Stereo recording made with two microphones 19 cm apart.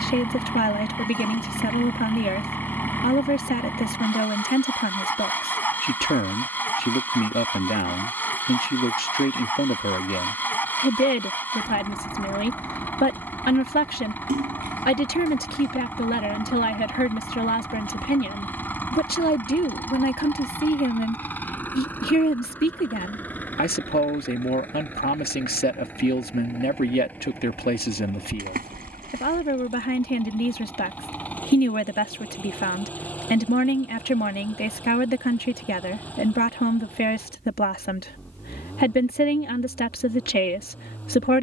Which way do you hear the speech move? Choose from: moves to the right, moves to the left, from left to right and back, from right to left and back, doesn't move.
doesn't move.